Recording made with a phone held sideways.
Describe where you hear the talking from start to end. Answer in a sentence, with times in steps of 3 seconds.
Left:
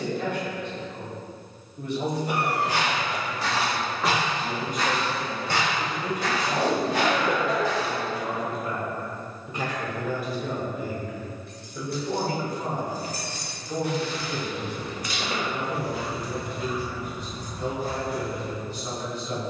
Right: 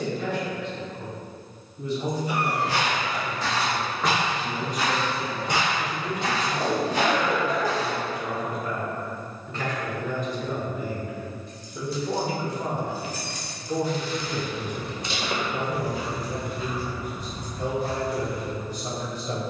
In this clip you hear the talking on the left from 0 s, in the centre from 9 s and on the right from 12 s.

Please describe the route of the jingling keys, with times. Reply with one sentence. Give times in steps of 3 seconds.
You can hear the jingling keys not at all from 0 s, on the left from 9 s and on the right from 15 s.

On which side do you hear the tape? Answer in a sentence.
You can hear the tape on the left.